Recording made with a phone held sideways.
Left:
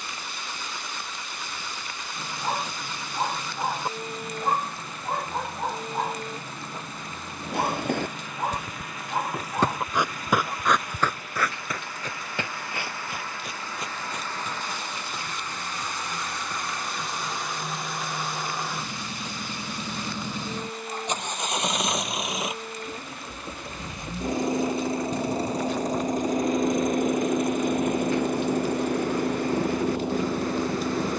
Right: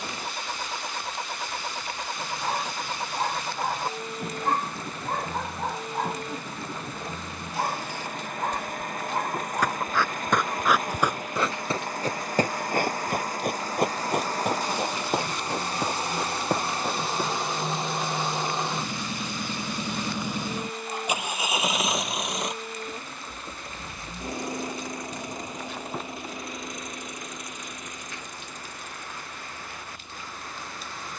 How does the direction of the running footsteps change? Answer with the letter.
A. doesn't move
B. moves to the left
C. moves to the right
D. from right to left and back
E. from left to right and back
C.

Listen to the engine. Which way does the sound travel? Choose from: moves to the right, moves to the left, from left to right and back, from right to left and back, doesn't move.
moves to the left.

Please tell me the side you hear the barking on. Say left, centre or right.
centre.